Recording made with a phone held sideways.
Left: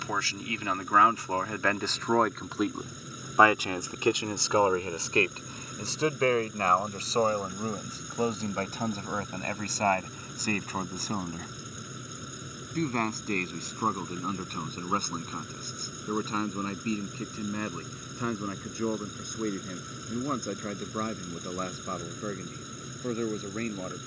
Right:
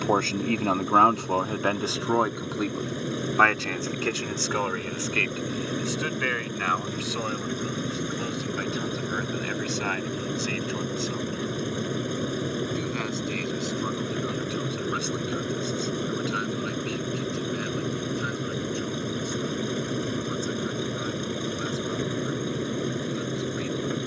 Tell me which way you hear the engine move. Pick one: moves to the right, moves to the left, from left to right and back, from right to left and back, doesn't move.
doesn't move.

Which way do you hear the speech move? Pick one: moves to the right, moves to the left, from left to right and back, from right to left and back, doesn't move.
moves to the left.